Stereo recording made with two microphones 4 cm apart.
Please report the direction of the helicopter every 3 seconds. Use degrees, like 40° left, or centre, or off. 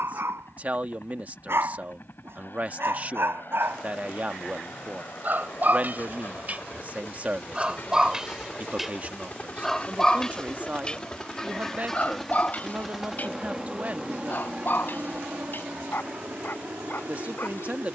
60° left, 50° left, 40° left, 20° left, 10° right, 50° right.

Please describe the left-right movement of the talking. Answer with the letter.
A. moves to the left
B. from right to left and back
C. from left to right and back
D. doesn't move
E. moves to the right
D.